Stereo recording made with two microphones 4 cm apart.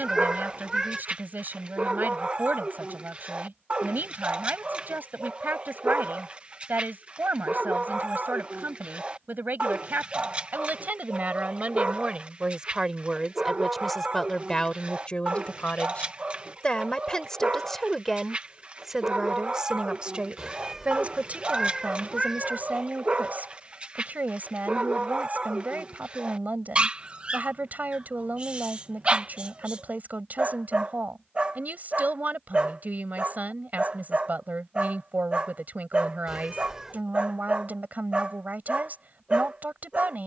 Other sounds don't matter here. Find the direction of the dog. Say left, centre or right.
right.